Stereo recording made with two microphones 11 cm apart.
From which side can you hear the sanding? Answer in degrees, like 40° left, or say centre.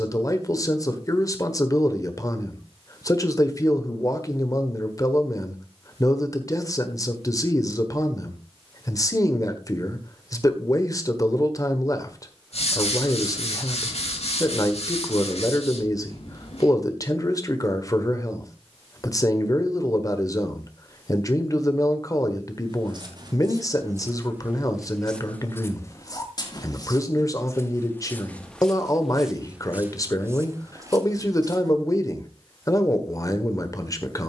80° left.